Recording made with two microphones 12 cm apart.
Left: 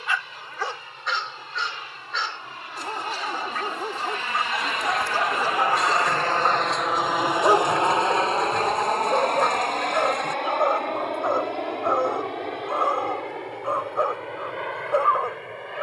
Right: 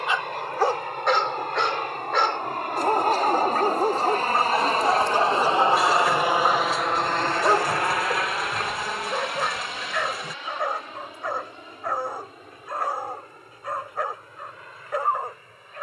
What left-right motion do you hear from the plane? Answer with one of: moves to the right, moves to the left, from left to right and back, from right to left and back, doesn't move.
moves to the left.